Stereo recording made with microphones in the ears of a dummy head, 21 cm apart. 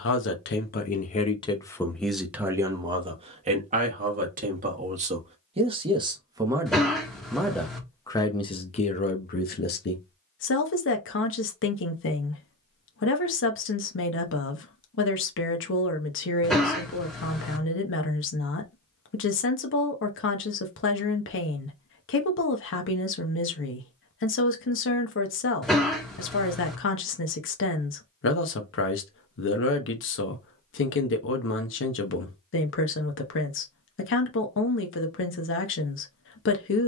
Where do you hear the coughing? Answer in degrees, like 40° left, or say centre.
centre.